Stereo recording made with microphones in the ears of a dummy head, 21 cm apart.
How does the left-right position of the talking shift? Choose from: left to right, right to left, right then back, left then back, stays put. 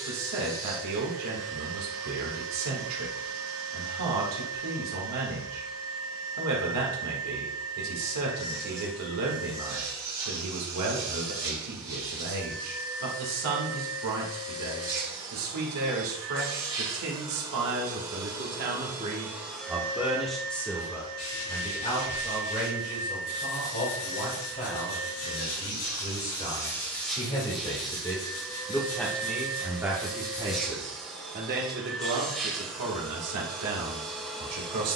left then back.